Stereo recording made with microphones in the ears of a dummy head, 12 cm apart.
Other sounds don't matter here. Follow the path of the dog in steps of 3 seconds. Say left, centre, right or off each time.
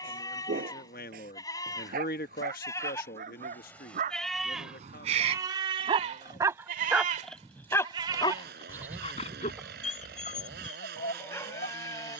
right, right, centre, left.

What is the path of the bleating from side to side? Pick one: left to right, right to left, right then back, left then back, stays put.
right then back.